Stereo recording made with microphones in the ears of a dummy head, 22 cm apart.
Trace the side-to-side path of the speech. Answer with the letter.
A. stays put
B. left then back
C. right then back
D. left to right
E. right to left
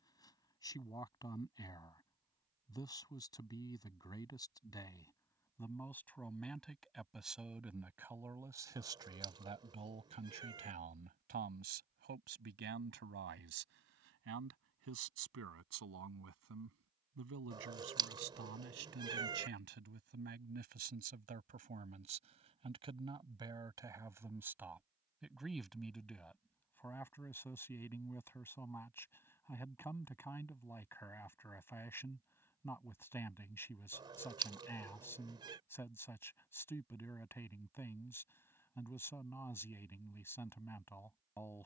C.